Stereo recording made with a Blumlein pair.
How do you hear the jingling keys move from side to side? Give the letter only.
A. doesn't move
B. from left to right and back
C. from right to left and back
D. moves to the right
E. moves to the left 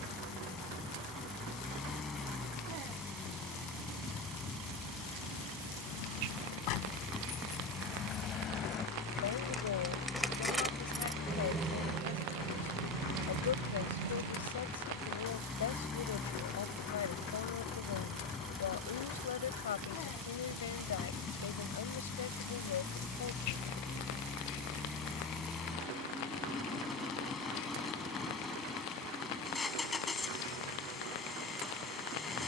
D.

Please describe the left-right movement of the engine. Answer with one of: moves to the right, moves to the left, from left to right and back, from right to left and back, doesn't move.
doesn't move.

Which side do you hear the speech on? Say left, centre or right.
left.